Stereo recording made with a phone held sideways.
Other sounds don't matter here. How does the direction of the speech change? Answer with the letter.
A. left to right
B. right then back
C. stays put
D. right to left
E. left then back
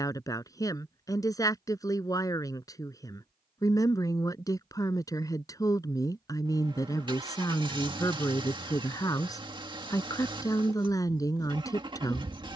C.